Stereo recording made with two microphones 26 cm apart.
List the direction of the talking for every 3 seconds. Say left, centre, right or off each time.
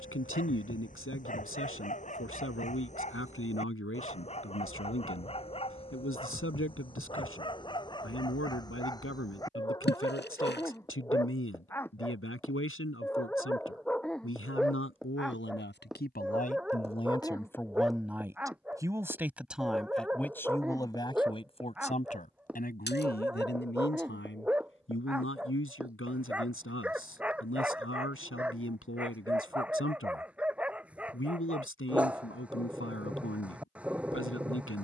left, left, left, left, left, left, centre, left, left, left, left, left.